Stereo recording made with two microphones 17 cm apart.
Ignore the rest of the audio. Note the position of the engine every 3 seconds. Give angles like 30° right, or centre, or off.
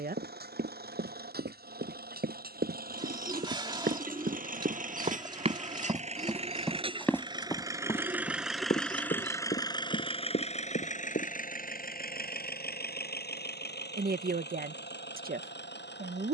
60° right, 50° right, 20° right, 40° left, 70° left, 80° left.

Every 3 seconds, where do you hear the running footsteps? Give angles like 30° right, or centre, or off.
70° right, 50° right, 20° left, 60° left, off, off.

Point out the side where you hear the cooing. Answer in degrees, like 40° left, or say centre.
30° right.